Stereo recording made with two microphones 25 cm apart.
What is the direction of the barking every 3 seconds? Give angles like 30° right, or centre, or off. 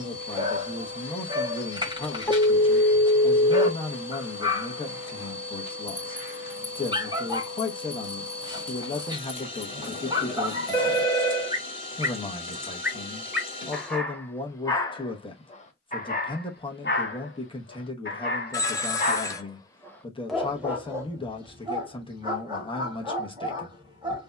20° right, 20° right, 20° right, 20° right, centre, 40° left, 20° left, 20° right.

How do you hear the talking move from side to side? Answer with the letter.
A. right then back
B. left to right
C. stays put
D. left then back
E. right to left
C.